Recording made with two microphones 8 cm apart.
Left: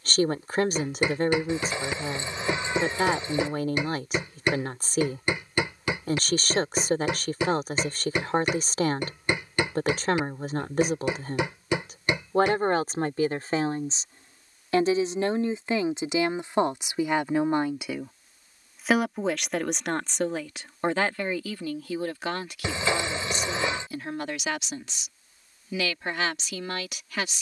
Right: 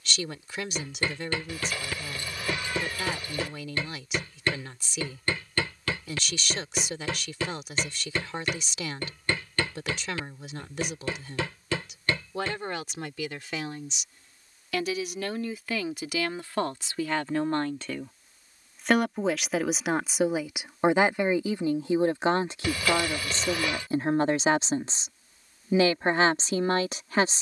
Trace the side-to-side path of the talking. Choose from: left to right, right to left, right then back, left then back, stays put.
left to right.